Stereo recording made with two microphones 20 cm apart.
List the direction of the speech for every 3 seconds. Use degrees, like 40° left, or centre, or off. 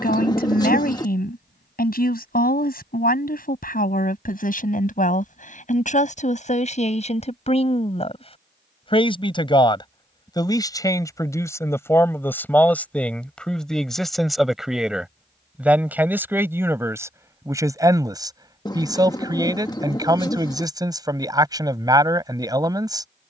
50° left, 40° left, 30° left, 20° left, centre, 10° right, 20° right, 20° right.